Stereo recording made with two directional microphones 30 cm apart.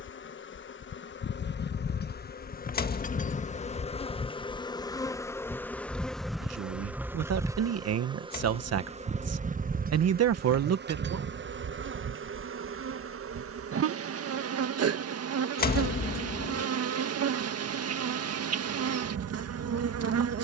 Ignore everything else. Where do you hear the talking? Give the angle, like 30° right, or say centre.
50° right.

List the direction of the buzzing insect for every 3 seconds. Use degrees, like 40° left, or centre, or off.
40° left, 20° left, 10° right, 30° right, 50° right, 50° right, 50° right.